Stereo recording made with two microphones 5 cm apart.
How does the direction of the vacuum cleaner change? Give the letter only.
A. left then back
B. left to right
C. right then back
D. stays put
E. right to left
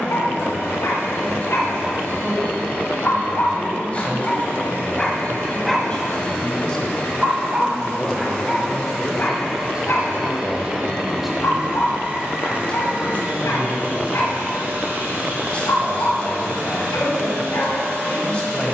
B.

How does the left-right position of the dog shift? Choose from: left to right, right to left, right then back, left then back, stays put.
right then back.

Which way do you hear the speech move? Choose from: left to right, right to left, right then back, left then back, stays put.
right then back.